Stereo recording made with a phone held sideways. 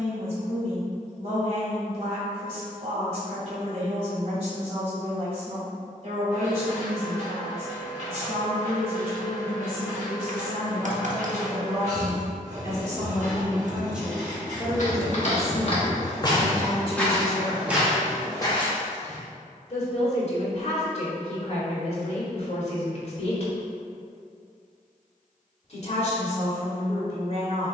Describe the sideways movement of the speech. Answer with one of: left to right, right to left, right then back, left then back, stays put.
right to left.